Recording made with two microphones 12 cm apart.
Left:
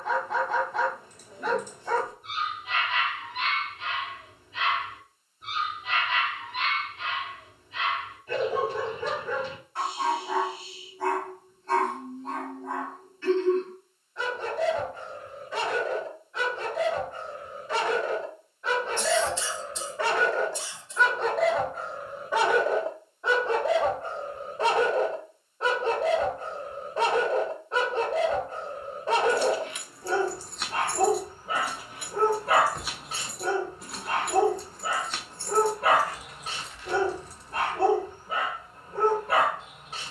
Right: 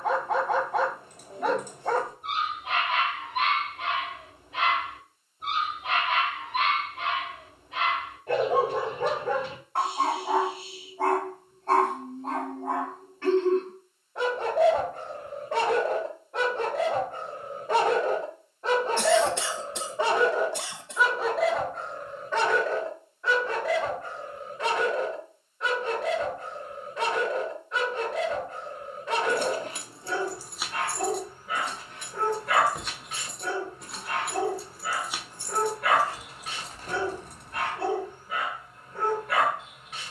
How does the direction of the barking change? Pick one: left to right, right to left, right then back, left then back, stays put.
right to left.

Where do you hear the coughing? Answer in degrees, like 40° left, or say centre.
70° right.